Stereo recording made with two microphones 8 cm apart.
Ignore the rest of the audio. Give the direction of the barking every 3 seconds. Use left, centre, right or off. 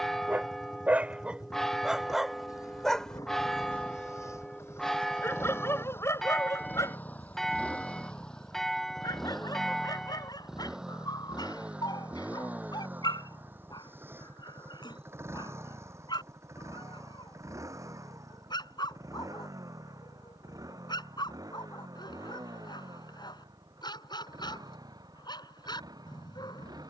centre, left, left, left, left, left, left, left, left.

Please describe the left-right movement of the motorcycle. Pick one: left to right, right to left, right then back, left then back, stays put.
left to right.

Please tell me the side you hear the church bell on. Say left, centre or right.
centre.